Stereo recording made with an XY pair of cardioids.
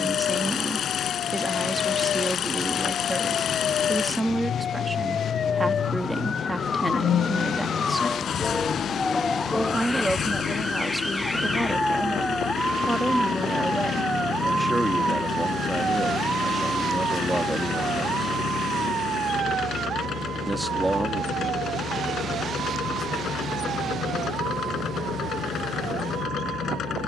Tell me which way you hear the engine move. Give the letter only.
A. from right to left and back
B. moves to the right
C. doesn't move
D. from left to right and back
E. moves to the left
C.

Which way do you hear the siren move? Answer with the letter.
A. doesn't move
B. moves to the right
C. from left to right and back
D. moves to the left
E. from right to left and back
B.